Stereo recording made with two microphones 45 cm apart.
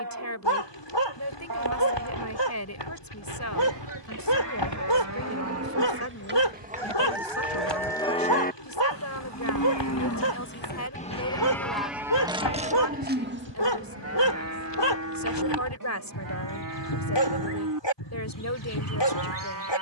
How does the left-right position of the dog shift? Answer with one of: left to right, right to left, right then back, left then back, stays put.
stays put.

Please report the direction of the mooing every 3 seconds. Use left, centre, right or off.
right, right, centre, left, right, right, right.